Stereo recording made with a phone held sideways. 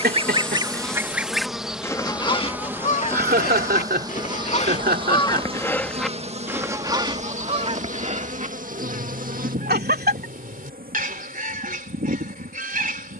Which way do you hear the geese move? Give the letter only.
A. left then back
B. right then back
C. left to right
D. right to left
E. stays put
A.